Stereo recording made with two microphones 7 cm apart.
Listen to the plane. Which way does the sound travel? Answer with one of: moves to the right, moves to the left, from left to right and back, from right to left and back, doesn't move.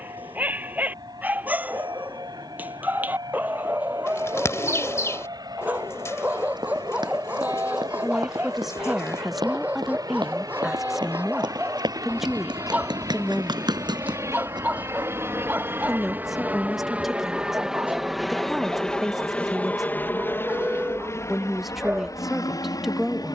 moves to the left.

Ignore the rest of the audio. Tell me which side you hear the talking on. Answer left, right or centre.
centre.